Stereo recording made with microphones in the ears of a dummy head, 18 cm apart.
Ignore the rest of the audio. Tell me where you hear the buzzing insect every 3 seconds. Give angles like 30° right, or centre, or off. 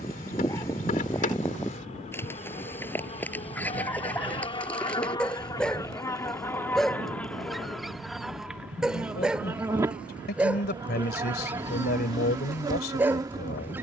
40° left, 30° left, centre, 20° right, 20° right.